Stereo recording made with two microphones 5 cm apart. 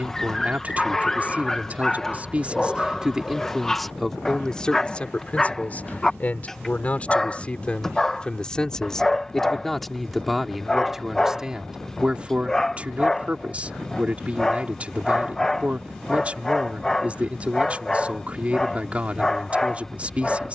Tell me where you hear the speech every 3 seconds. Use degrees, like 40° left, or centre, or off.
30° right, 10° left, 20° left, centre, 20° right, 20° right, 20° right.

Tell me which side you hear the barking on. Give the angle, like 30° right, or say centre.
10° left.